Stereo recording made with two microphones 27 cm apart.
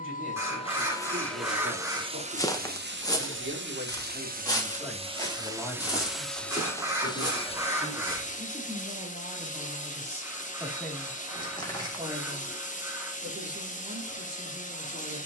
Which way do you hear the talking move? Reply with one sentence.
In this clip you hear the talking move from right to left and back again.